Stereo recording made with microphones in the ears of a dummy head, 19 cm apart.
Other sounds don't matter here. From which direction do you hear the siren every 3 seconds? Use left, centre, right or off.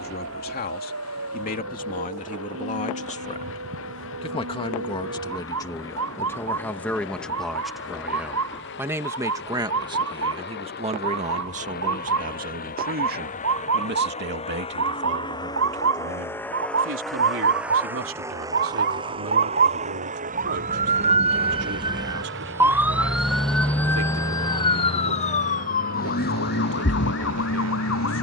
right, right, right, right, right, right, right, centre, left, left.